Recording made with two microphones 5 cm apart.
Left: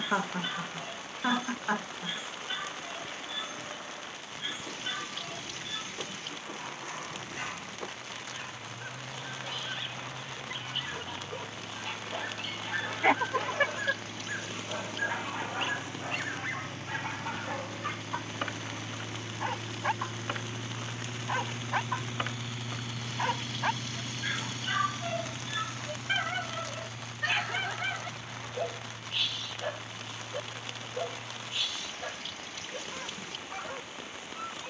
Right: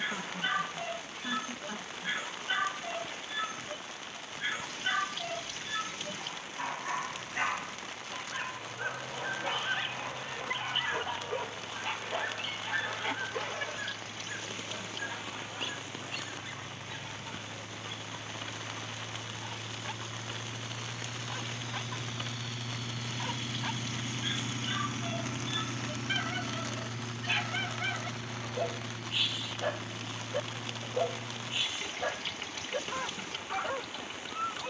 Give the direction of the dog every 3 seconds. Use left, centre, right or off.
right, right, right, right, centre, left, left, left, left, centre, right, right.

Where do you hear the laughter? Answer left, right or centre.
left.